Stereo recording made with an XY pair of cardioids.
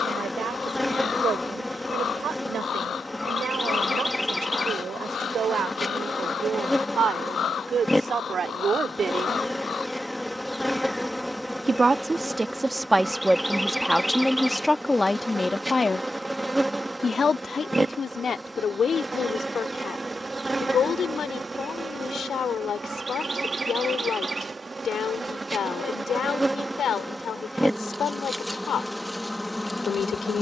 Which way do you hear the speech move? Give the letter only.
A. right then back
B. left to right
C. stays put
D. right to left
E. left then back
D.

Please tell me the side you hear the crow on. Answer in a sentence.
In this clip you hear the crow on the left.